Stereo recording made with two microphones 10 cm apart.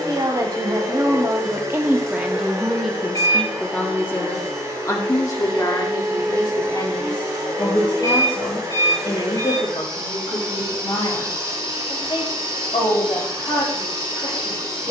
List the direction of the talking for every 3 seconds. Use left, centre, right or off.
right, left, left, left, left.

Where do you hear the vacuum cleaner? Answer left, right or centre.
right.